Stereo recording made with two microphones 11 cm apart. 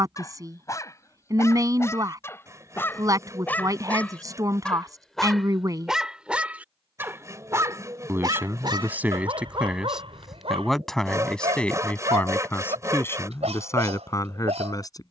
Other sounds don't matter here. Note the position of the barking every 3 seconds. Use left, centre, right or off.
left, centre, right, right, right.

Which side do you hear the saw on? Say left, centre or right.
right.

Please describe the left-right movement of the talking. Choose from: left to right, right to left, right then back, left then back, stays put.
right to left.